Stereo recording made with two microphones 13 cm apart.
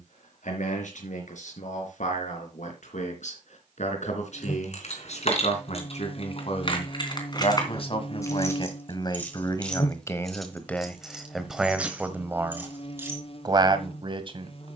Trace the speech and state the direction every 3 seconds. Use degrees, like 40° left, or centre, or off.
70° left, 60° left, 50° left, 10° left, 30° right.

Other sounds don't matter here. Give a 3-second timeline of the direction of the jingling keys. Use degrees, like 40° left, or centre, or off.
off, 60° left, 30° left, centre, 20° right.